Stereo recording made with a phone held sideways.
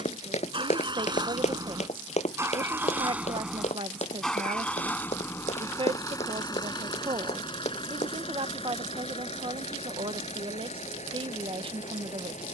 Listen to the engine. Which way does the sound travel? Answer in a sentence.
You can hear the engine move from right to left.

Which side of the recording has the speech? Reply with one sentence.
You can hear the speech on the right.